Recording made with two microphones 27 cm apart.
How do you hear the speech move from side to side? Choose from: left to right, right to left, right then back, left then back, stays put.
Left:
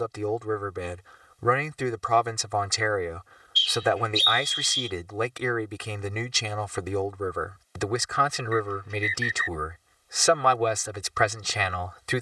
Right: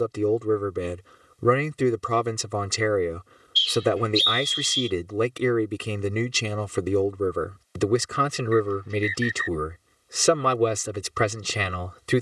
stays put.